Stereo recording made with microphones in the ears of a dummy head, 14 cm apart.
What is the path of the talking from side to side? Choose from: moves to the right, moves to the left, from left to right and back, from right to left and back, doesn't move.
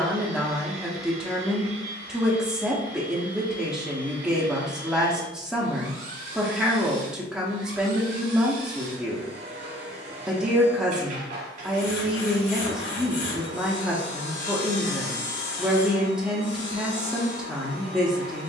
doesn't move.